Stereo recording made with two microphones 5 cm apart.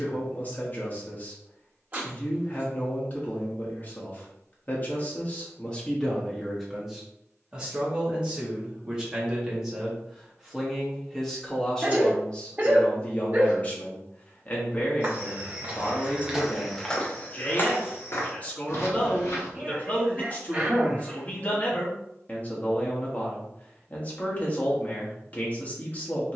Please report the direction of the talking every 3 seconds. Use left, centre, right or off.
left, left, centre, centre, left, left, left, left, left.